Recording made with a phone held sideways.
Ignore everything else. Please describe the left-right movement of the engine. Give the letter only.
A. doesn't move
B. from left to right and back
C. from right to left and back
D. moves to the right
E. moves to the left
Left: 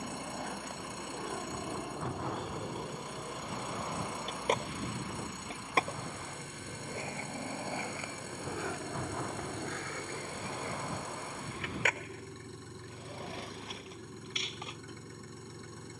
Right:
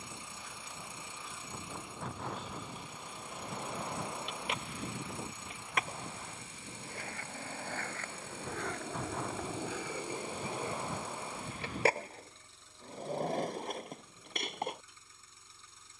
A.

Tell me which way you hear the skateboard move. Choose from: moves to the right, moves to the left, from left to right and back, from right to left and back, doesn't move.
moves to the right.